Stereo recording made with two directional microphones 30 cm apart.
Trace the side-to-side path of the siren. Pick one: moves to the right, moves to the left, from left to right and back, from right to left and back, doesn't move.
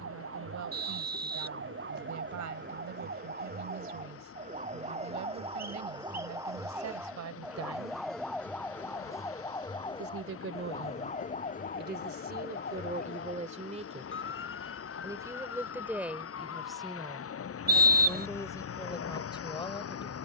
moves to the left.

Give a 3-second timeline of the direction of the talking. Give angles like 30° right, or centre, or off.
70° right, 70° right, 60° right, 40° right, 30° right, centre, 10° left.